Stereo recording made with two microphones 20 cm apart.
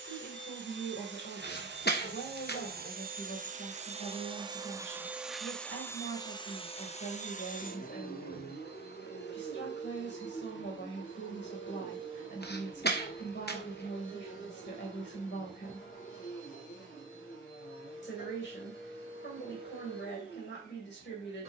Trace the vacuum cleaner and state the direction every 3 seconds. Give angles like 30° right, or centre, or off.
60° right, 20° right, 40° left, 60° left, 70° left, 80° left, 80° left.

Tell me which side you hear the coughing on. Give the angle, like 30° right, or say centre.
50° left.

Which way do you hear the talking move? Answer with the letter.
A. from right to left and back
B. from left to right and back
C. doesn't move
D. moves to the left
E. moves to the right
C.